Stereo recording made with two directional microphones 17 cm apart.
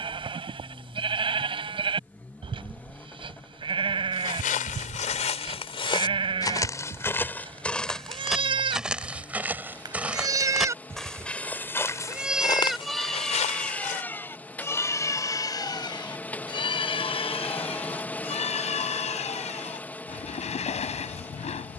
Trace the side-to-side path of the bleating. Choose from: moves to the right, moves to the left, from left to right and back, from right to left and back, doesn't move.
moves to the left.